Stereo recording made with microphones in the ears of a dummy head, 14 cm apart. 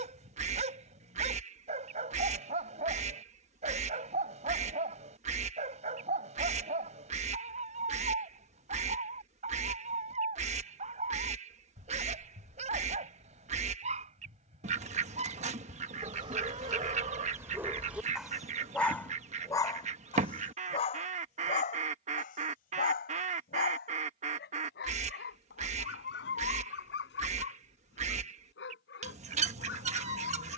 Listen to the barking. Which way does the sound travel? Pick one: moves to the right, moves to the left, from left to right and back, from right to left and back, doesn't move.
moves to the left.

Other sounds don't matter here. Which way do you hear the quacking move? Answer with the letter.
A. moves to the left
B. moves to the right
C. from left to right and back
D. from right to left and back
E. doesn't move
E.